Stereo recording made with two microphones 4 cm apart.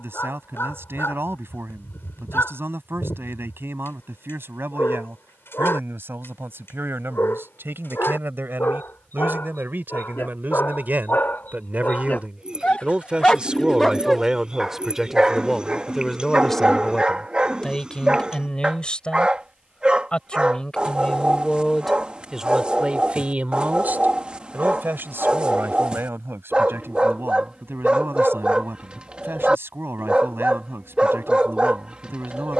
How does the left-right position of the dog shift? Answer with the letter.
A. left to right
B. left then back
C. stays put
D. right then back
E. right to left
A.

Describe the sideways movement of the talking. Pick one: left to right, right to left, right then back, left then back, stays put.
left then back.